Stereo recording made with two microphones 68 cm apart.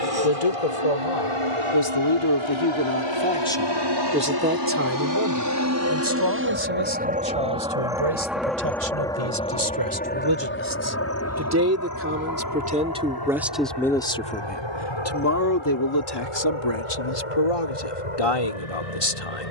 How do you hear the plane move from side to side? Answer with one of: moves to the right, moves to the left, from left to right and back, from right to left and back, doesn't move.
moves to the left.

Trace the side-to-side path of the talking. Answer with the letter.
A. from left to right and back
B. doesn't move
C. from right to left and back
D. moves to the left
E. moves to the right
A.